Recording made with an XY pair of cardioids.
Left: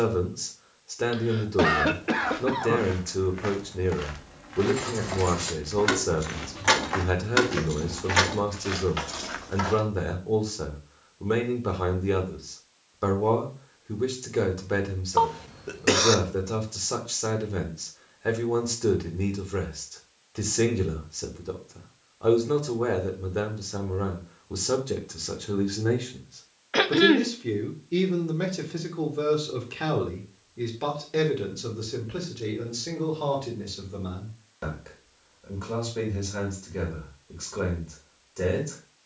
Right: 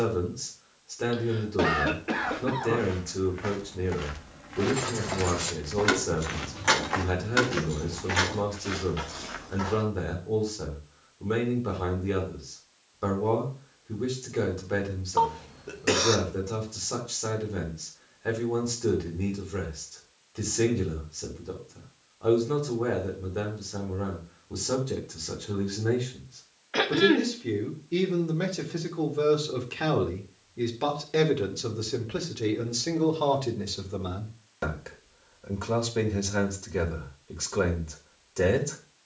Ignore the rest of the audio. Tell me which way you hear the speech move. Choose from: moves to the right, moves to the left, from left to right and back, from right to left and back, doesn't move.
moves to the right.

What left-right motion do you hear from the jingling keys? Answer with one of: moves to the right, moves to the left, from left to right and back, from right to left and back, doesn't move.
moves to the left.